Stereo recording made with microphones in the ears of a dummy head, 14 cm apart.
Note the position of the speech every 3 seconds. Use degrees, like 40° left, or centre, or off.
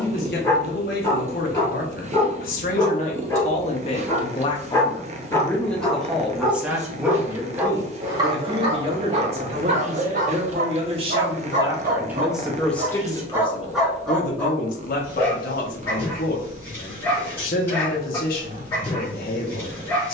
60° left, 30° left, 20° right, 40° right, 30° left, 60° left, 60° left.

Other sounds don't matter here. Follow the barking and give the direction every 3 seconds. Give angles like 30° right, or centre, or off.
20° left, 20° left, 20° right, 50° right, 10° right, 10° left, 10° left.